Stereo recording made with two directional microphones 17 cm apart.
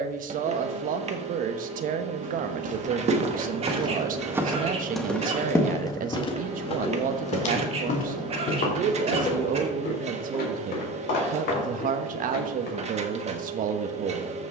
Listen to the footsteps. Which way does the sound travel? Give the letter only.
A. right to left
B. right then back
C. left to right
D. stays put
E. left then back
A.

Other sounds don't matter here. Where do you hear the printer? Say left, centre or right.
right.